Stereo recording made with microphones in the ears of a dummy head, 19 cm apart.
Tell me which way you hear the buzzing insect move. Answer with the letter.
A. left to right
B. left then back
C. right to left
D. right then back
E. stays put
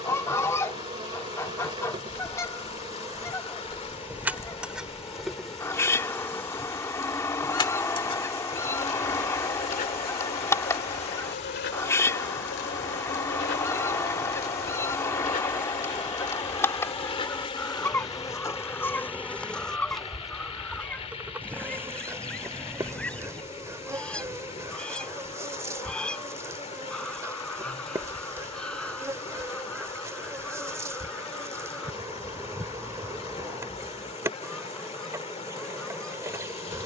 B.